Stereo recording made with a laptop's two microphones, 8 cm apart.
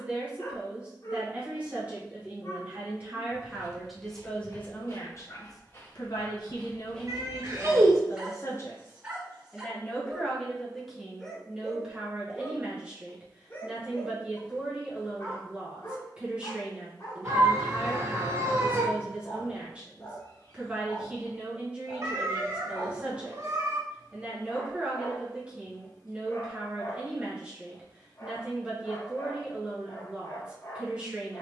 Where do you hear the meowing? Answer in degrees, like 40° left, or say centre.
50° right.